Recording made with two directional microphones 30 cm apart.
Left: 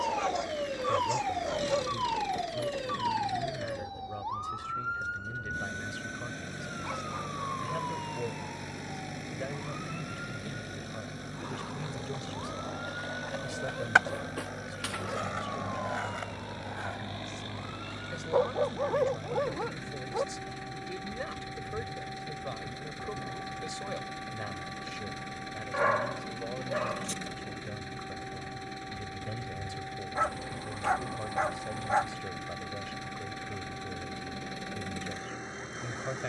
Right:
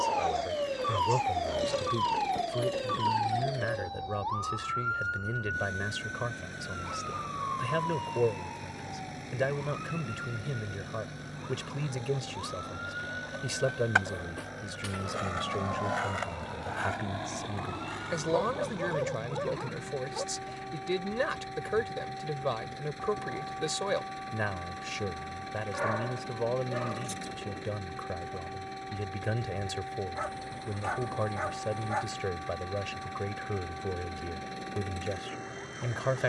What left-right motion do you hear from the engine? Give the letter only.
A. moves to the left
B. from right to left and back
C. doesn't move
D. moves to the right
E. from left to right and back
C.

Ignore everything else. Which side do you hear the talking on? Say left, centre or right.
right.